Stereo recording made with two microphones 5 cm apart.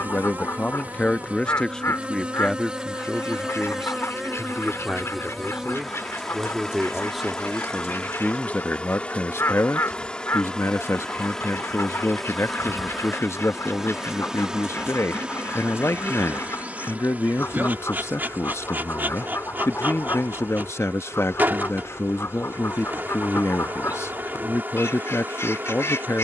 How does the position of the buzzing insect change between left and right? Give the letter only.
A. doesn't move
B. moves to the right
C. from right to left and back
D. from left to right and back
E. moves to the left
C.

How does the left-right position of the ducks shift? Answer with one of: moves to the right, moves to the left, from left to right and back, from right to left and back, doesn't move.
doesn't move.